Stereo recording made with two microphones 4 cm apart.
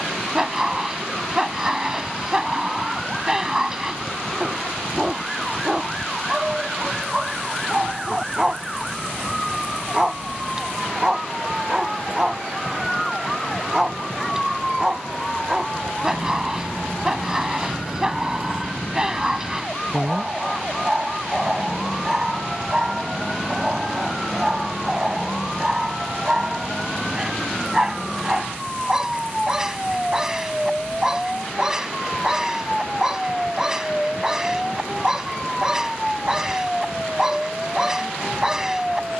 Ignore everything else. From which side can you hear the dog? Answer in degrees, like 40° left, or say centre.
10° right.